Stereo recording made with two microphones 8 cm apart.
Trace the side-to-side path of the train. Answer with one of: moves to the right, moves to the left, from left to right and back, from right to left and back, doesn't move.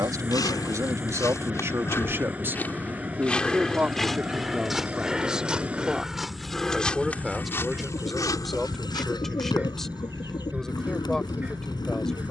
doesn't move.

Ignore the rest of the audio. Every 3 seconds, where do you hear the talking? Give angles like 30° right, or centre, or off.
40° right, 10° right, centre, 10° left.